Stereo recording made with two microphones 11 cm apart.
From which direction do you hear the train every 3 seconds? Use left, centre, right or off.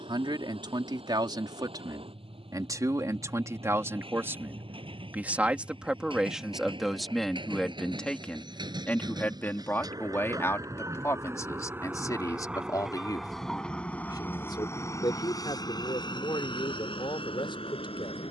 right, right, right, right, centre, left.